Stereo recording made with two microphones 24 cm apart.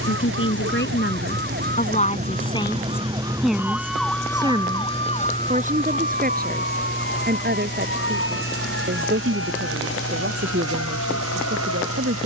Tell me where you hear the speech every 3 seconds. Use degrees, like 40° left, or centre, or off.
40° left, 20° right, 40° right, 50° right.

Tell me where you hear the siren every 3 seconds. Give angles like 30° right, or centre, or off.
50° right, 10° left, 50° left, 70° left.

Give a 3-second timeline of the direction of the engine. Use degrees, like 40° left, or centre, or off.
40° right, centre, 30° left, 50° left.